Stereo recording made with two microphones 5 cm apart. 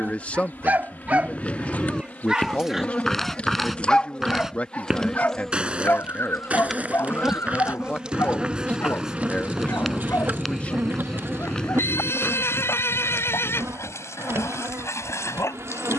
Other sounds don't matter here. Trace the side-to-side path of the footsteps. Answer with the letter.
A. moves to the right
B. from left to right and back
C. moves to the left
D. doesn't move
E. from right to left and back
B.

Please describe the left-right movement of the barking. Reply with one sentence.
In this clip you hear the barking go from the right side to the left.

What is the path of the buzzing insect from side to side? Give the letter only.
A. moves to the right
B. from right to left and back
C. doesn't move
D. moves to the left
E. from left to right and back
A.